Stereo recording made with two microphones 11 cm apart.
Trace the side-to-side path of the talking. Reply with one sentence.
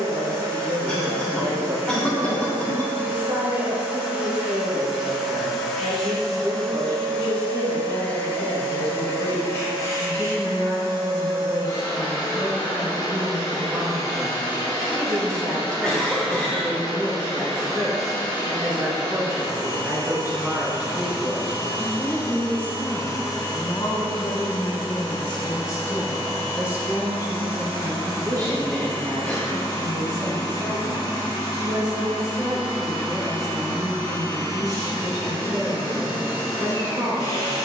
In this clip you hear the talking go left and come back.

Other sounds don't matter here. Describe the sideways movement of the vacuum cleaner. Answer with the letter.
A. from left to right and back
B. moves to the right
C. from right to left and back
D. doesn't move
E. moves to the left
E.